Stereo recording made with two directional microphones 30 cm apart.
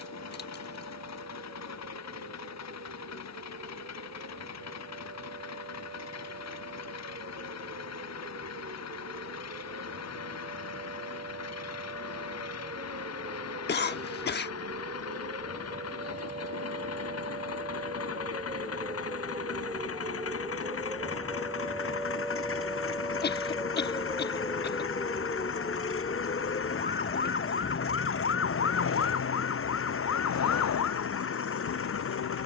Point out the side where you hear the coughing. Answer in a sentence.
You can hear the coughing on the left.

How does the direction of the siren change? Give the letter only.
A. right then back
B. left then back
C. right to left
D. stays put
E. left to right
C.